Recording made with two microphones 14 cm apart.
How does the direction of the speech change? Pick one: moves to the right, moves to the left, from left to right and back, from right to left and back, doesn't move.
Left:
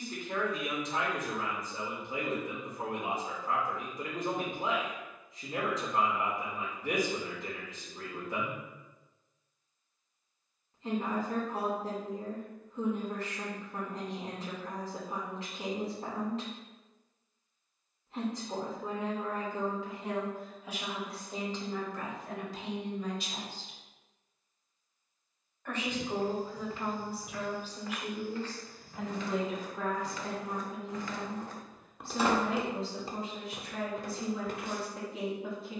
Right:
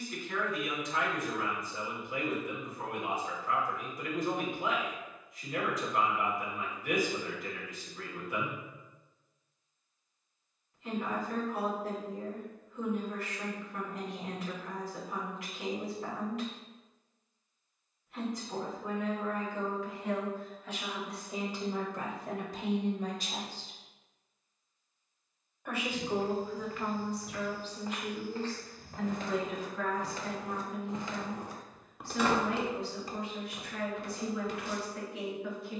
from left to right and back.